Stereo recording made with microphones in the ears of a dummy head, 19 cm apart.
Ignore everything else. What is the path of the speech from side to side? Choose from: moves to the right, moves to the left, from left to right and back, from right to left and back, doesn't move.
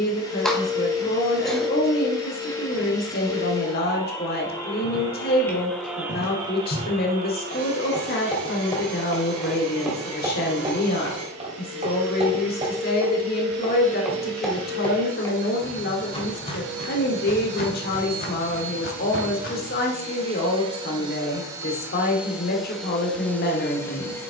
doesn't move.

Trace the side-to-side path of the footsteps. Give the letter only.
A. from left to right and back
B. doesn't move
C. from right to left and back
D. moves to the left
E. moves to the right
A.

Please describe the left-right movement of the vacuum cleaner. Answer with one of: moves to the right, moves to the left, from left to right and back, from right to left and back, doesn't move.
from left to right and back.